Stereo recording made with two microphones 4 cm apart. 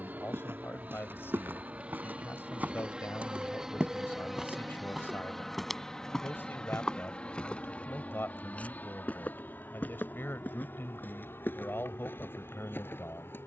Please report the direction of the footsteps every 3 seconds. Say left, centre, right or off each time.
right, centre, left, left, left.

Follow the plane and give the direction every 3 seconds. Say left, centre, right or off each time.
right, centre, left, left, left.